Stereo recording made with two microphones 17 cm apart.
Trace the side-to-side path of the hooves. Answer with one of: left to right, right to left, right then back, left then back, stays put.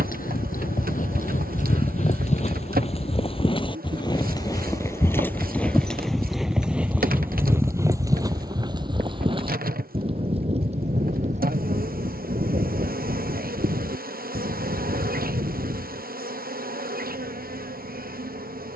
left to right.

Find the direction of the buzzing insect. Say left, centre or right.
right.